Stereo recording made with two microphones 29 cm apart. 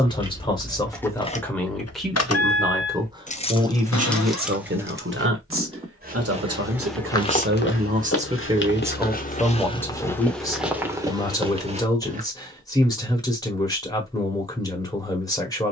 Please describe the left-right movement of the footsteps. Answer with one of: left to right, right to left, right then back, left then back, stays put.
left then back.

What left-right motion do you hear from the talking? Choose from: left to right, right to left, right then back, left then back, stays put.
right then back.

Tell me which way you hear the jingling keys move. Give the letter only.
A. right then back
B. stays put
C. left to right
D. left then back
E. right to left
D.